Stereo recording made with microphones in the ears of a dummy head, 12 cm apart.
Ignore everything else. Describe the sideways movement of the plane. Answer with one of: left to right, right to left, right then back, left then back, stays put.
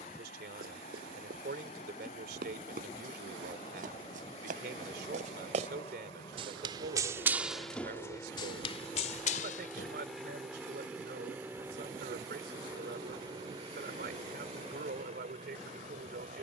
left to right.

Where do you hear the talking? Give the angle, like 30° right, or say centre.
70° right.